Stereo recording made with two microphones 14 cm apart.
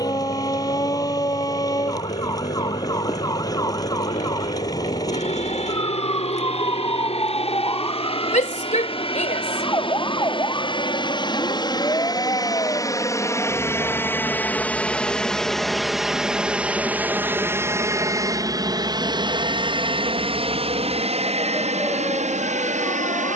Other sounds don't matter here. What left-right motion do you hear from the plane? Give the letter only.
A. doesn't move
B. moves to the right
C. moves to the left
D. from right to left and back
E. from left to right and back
B.